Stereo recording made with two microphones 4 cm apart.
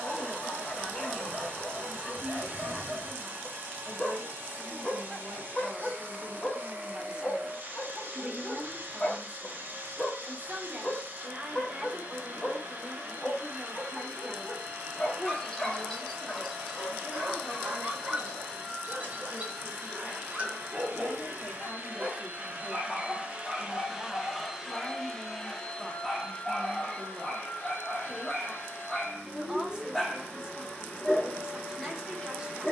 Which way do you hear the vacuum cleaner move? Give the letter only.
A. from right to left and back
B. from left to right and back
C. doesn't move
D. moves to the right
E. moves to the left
E.